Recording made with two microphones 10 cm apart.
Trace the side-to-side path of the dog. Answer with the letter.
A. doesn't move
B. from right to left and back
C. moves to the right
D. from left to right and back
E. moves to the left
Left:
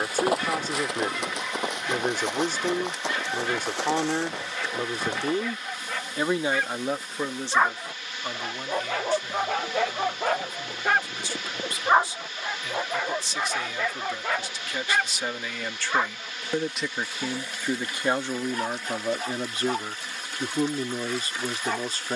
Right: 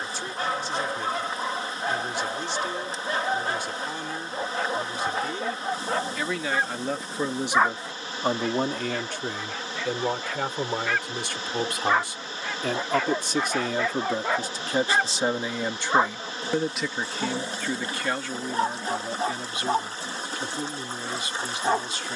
B.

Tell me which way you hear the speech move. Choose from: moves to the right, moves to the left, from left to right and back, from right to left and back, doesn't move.
from left to right and back.